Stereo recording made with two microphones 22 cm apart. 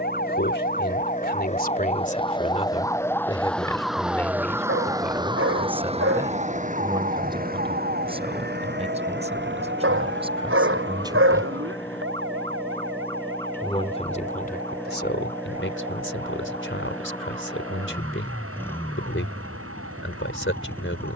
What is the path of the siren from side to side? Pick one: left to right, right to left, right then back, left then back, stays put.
left to right.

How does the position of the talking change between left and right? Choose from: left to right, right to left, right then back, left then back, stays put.
right then back.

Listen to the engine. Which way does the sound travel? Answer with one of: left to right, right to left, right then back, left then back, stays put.
stays put.